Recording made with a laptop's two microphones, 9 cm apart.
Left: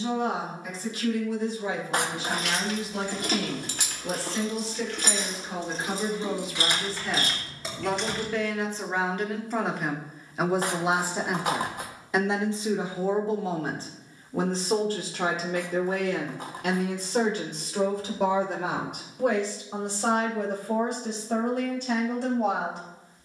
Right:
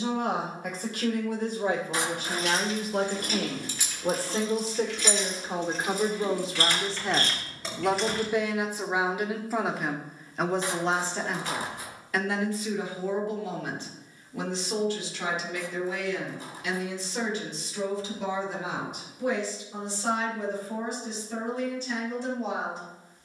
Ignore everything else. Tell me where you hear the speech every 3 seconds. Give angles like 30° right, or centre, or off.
50° right, 40° right, 20° right, 10° left, 30° left, 50° left, 60° left, 70° left.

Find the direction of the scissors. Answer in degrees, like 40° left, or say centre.
60° left.